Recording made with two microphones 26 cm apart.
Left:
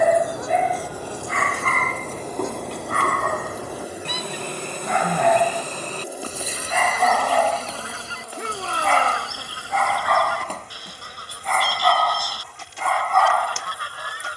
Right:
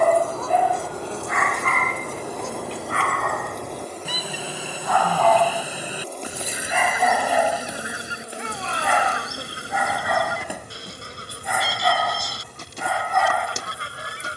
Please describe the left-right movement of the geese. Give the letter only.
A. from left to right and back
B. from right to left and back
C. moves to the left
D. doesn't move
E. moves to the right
E.